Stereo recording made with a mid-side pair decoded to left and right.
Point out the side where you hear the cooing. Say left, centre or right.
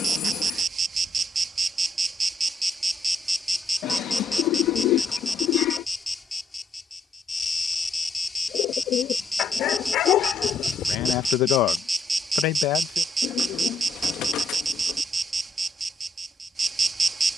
left.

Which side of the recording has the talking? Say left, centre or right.
left.